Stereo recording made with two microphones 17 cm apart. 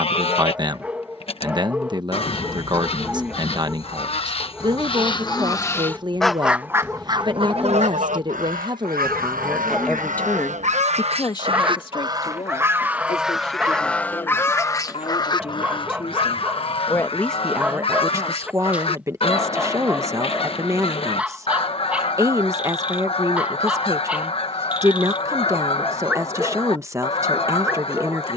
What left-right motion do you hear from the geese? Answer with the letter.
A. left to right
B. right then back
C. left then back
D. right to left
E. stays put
B.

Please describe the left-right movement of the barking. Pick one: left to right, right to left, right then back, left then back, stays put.
stays put.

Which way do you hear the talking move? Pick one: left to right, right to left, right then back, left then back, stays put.
left then back.